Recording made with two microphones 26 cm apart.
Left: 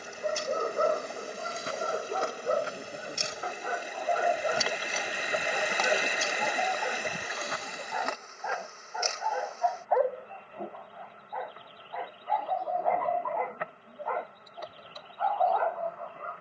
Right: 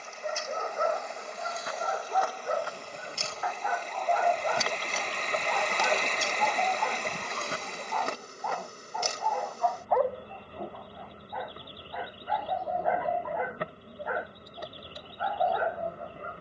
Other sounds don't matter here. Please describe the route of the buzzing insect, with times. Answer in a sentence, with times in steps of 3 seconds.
You can hear the buzzing insect on the left from 0 s, in the centre from 3 s and on the right from 6 s.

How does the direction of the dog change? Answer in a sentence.
You can hear the dog move to the right.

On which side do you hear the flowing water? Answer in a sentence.
In this clip you hear the flowing water in the centre.